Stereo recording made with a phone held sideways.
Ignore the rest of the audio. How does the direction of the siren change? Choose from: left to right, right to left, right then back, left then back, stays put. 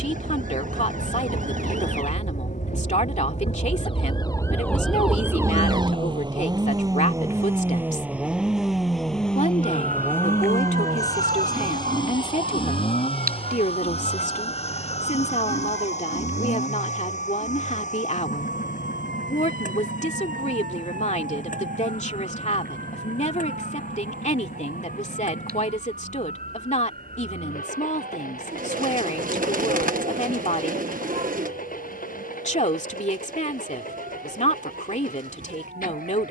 left to right.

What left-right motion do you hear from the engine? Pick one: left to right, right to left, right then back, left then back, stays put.
right to left.